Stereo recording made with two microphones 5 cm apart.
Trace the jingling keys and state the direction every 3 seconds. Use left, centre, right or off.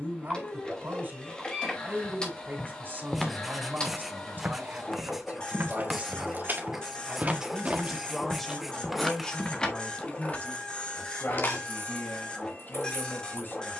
off, right, right, left, left.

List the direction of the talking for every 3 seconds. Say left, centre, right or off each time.
right, right, centre, left, left.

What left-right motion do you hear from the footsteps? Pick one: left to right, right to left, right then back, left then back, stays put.
right then back.